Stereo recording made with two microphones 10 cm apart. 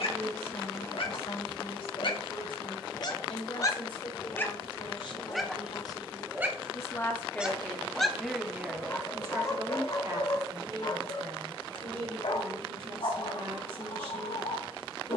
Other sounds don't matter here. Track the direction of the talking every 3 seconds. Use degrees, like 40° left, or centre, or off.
70° left, 50° left, 10° left, 40° right, 60° right.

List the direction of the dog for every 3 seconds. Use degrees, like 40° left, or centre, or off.
60° left, 10° left, 10° right, 40° left, 70° left.